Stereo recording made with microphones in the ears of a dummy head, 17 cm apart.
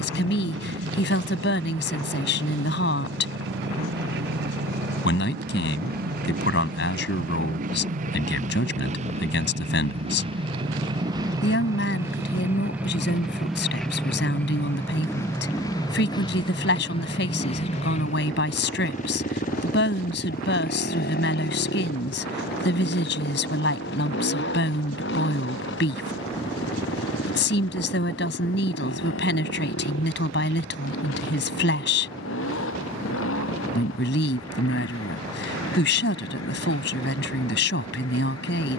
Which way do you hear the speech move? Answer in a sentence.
You can hear the speech stay put.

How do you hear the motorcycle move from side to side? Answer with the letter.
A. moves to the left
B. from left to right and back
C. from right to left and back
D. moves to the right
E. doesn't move
A.